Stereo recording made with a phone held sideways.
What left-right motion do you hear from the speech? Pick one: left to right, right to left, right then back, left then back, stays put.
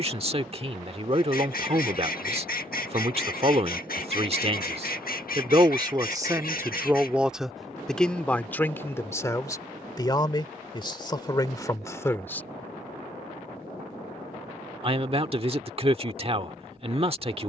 left then back.